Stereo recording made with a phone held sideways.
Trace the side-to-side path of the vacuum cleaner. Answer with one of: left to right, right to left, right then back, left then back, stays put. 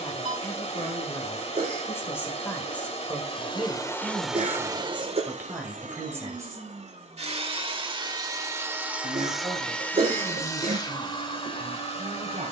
right then back.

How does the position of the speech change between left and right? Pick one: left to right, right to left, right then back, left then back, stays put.
left to right.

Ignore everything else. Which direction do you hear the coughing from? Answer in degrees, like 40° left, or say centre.
40° right.